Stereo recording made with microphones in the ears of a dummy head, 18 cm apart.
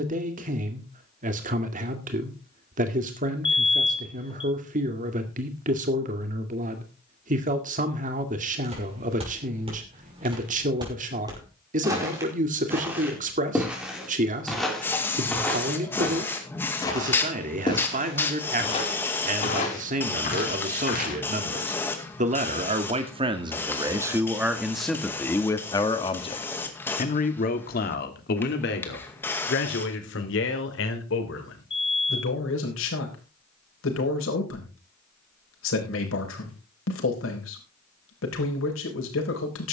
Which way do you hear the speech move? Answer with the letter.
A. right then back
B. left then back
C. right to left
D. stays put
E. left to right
C.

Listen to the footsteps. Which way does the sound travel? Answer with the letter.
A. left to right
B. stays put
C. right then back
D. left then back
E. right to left
E.